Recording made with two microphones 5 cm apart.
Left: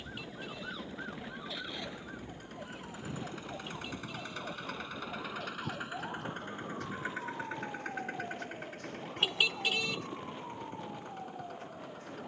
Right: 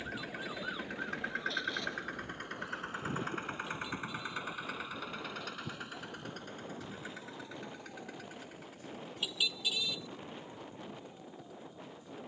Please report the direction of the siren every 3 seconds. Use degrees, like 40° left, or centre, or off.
10° left, 50° left, 60° left, 60° left.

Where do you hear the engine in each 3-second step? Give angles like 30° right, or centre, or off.
60° right, 10° right, 40° left, 50° left.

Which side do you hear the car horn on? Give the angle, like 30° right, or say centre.
50° left.